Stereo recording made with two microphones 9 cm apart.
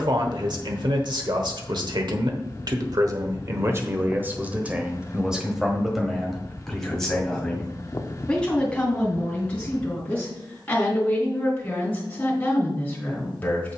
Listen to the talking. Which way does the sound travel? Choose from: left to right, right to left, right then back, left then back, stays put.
right to left.